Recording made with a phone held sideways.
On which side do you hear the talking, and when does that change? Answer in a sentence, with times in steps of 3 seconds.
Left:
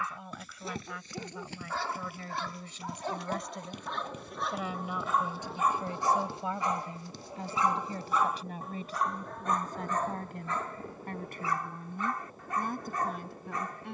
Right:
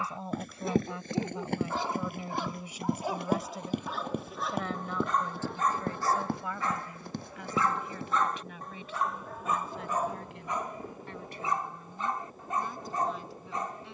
In this clip you hear the talking on the right from 0 s, in the centre from 3 s and on the left from 6 s.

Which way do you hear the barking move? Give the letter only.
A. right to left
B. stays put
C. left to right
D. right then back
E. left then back
E.